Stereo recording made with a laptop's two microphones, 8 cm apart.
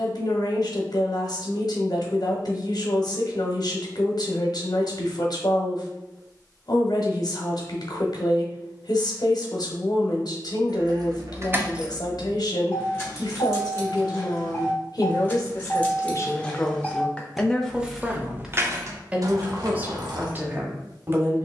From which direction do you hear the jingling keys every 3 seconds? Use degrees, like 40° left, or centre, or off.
off, off, off, 40° right, 30° left, 10° left, 50° right.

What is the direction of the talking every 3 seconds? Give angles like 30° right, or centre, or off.
60° left, 60° left, 60° left, 60° left, 60° left, 30° left, 20° right.